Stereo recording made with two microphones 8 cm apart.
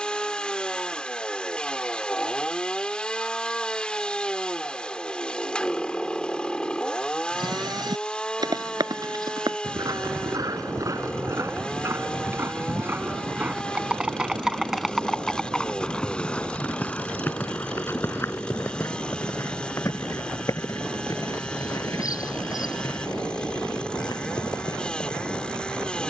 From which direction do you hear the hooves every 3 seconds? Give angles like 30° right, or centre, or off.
off, off, 60° right, 50° right, 20° right, 20° left, 40° left, 50° left, 60° left.